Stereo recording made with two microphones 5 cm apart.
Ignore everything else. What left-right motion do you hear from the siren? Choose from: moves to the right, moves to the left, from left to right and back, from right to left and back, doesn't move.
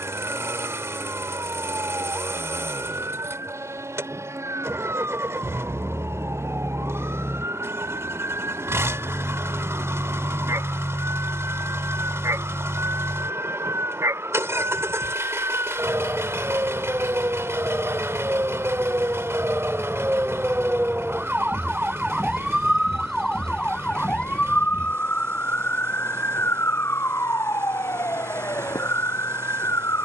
moves to the left.